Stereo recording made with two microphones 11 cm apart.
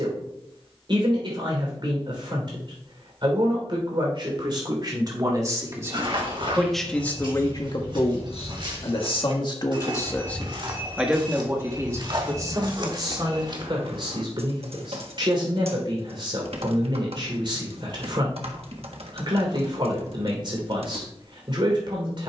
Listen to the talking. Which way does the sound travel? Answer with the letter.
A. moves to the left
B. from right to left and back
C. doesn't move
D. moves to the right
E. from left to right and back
B.